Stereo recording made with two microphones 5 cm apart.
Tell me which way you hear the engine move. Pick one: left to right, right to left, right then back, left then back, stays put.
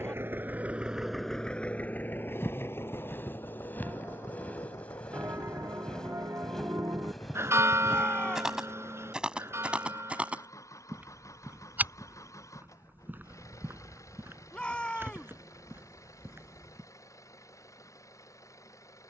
right to left.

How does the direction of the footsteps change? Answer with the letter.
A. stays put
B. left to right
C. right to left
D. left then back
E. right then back
B.